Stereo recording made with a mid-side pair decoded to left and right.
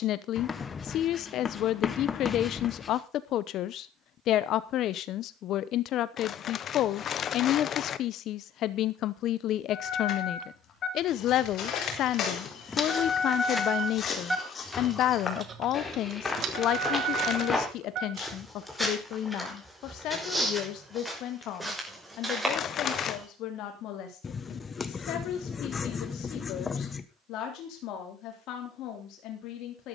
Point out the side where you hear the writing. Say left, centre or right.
left.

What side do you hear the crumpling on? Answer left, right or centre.
left.